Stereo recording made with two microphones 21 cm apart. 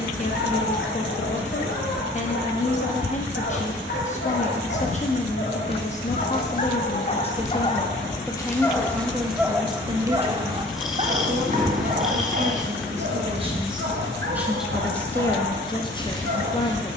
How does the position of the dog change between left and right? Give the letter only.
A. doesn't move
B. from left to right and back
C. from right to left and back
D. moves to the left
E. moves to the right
E.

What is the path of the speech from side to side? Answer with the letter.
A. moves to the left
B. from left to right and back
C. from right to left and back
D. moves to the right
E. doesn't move
B.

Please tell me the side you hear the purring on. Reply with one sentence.
You can hear the purring in the centre.